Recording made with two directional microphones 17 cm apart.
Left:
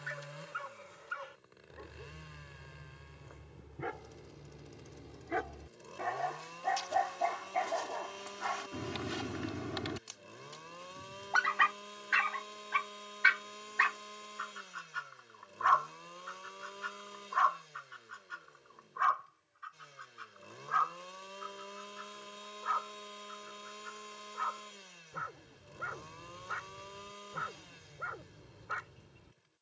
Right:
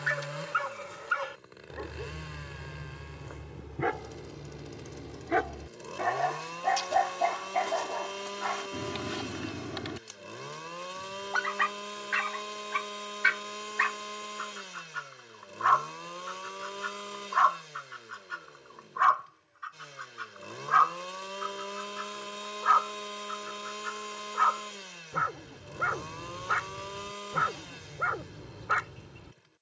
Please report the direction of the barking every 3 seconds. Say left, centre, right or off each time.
right, right, right, centre, centre, right, right, right, right, right.